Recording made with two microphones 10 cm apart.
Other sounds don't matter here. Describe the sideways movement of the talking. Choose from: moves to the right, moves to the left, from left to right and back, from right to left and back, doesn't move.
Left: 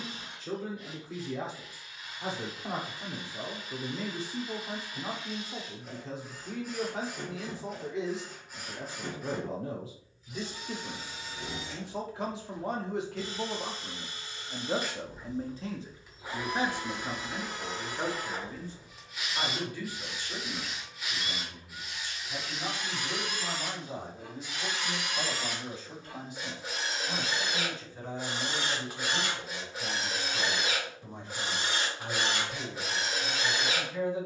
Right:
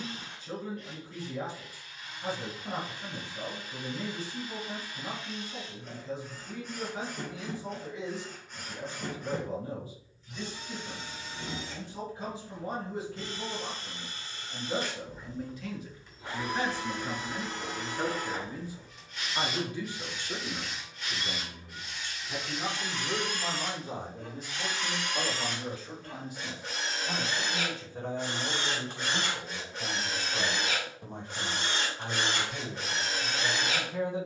moves to the right.